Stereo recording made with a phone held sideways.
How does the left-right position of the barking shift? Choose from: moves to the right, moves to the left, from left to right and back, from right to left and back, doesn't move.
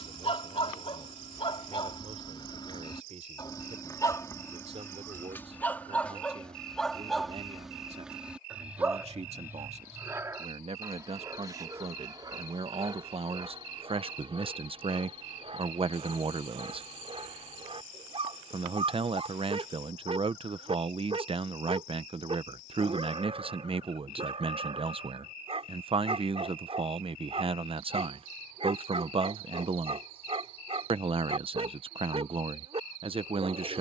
moves to the right.